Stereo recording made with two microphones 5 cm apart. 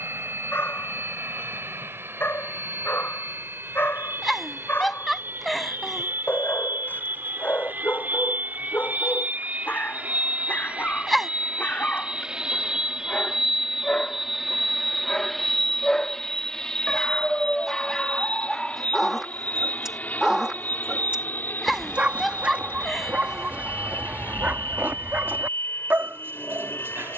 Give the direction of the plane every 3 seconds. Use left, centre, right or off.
right, right, right, right, centre, centre, left, left, left.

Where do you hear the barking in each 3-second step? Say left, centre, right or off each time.
left, left, left, left, left, centre, centre, right, right.